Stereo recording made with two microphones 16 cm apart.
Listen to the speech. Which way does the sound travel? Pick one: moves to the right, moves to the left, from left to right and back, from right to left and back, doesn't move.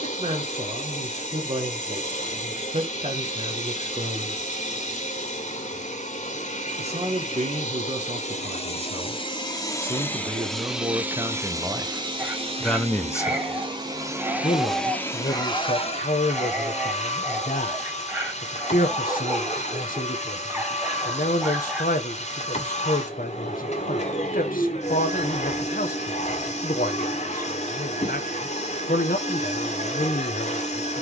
moves to the left.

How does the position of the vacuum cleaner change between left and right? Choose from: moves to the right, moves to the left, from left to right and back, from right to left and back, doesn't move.
from left to right and back.